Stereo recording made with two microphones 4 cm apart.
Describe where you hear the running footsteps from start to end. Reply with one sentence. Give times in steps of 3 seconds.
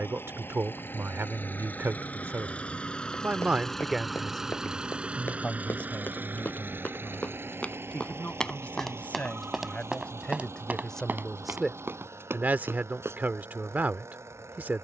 In this clip you hear the running footsteps not at all from 0 s, on the left from 3 s and on the right from 9 s.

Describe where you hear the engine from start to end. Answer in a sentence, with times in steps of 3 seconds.
In this clip you hear the engine on the left from 0 s, in the centre from 3 s and on the right from 6 s.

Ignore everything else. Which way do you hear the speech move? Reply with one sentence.
In this clip you hear the speech move from right to left and back again.